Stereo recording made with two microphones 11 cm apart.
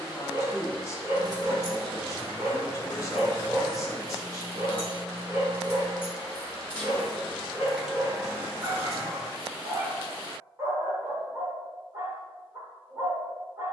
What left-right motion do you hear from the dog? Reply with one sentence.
In this clip you hear the dog stay in one place.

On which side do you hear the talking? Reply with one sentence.
In this clip you hear the talking on the left.